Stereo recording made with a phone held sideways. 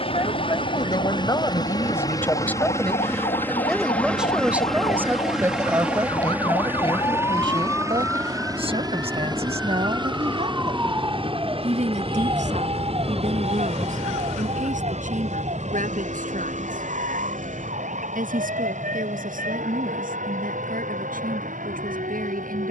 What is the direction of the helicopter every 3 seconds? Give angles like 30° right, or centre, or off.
30° left, centre, 20° right, 30° right, 40° right, 50° right, 60° right, 60° right.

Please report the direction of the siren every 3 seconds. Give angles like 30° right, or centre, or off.
50° left, 40° left, 20° left, 20° right, 40° right, 60° right, 70° right, 70° right.